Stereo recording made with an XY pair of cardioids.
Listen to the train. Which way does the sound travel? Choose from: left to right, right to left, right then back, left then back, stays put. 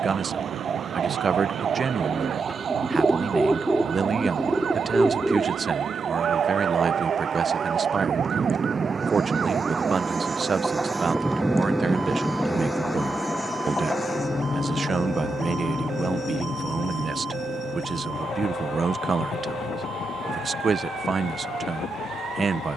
right to left.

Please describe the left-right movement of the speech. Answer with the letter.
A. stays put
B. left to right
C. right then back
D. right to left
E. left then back
A.